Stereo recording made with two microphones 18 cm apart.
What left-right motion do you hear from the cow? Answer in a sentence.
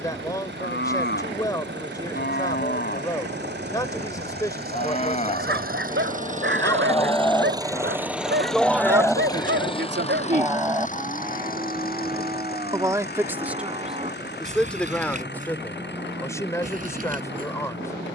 You can hear the cow move to the right.